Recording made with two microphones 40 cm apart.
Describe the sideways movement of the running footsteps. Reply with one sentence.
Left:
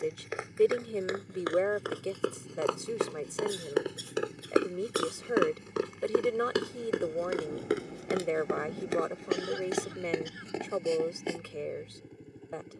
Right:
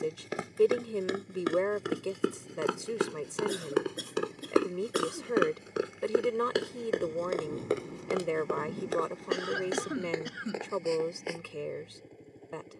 In this clip you hear the running footsteps go from the right side to the left.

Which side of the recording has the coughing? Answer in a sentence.
You can hear the coughing on the right.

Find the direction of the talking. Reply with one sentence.
In this clip you hear the talking in the centre.